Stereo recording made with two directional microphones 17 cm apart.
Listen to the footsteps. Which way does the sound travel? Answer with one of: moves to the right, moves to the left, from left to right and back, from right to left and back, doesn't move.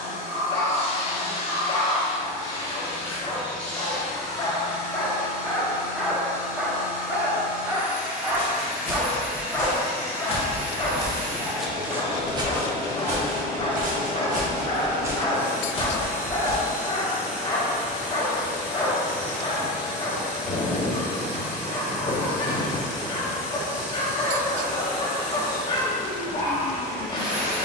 from left to right and back.